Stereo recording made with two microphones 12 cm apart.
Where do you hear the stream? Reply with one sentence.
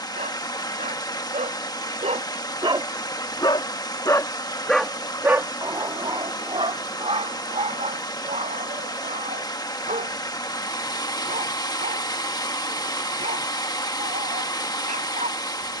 You can hear the stream on the left.